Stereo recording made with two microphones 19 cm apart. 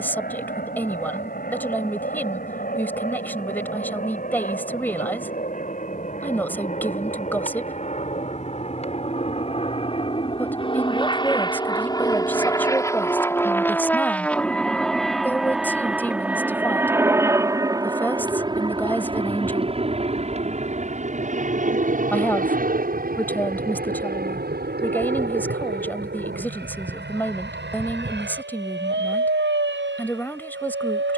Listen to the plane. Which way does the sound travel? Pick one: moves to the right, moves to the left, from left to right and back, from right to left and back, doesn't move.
moves to the right.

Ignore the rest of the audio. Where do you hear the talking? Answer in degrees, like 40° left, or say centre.
10° left.